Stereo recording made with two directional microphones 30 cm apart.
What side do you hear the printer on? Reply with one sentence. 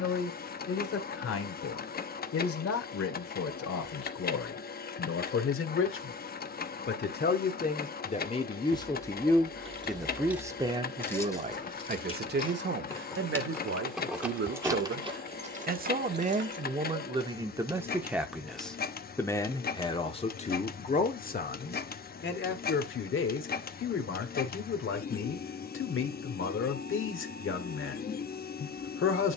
In this clip you hear the printer on the left.